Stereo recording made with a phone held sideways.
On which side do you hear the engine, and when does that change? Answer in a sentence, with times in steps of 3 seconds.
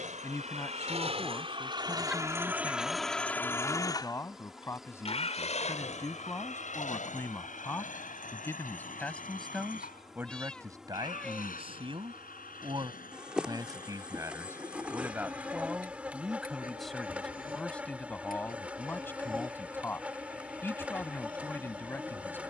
You can hear the engine on the right from 0 s and on the left from 3 s.